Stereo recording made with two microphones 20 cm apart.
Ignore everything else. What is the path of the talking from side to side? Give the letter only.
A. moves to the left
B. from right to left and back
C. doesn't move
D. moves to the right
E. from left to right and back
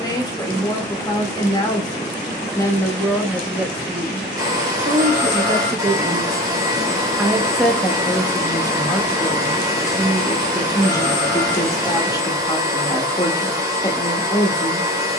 E.